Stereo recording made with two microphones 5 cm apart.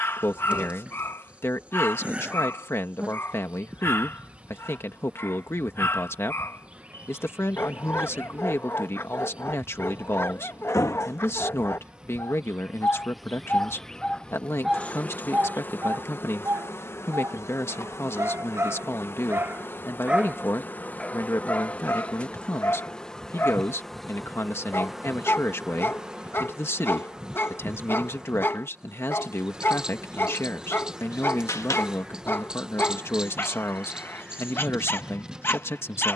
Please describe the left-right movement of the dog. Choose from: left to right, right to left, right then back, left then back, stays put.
right then back.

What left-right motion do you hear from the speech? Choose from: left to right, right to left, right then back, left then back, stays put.
stays put.